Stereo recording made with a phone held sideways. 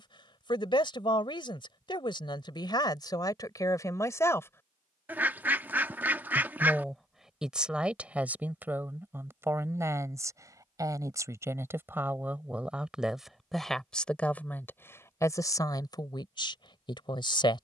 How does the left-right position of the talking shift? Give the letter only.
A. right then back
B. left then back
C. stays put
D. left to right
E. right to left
A.